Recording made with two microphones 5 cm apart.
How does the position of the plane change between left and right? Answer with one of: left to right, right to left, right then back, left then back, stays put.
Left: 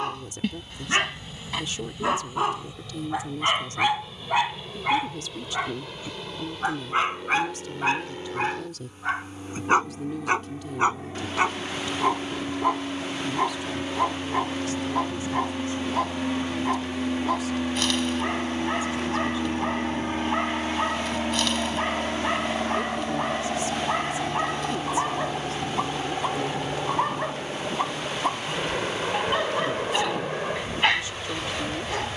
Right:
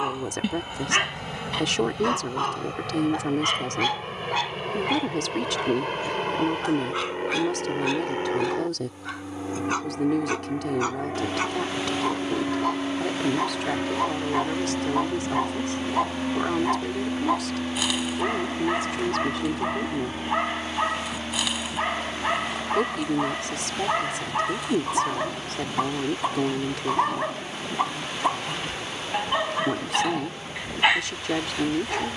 right to left.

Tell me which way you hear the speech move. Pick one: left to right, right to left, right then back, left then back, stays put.
stays put.